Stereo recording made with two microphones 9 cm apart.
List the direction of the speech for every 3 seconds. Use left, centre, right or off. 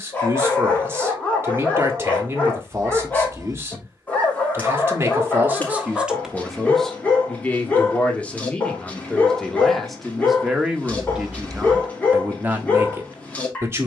right, right, centre, centre, right.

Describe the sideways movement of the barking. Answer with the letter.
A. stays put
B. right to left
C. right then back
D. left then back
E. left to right
A.